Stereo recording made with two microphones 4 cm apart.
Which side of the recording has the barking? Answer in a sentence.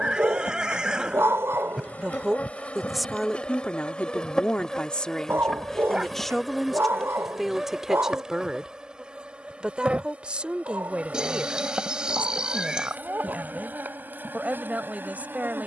You can hear the barking on the right.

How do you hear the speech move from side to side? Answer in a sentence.
You can hear the speech go left and come back.